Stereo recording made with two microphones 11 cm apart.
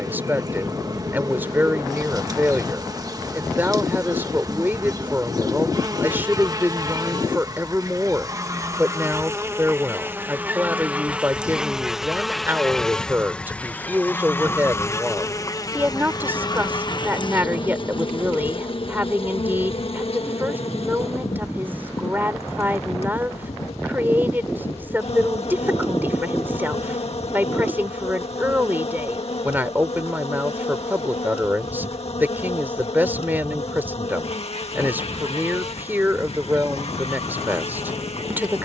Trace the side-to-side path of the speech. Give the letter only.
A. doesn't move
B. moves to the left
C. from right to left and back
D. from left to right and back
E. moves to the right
A.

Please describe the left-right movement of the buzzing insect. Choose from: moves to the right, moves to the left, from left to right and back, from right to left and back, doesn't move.
moves to the left.